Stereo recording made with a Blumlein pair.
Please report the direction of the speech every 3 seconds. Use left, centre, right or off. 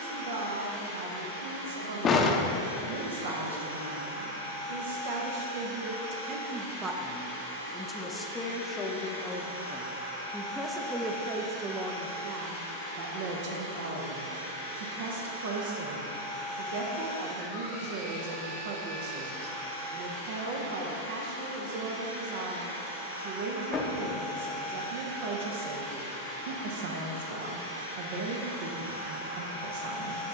right, right, centre, centre, right, right, right, right, right, right.